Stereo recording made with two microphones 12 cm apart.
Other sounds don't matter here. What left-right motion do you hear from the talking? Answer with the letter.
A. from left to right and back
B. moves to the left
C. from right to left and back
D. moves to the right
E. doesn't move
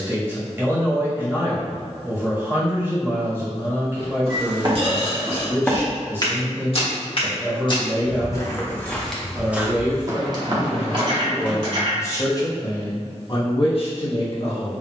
B.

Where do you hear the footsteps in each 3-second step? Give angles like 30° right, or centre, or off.
off, 30° right, 30° left, 30° right, off.